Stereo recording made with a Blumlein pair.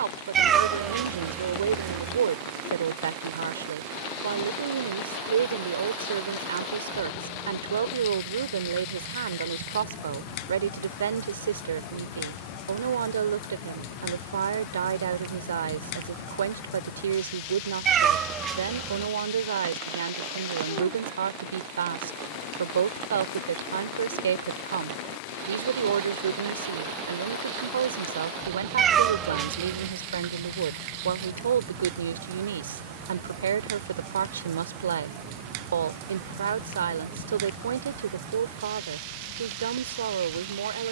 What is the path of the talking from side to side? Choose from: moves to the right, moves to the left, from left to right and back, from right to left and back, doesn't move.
doesn't move.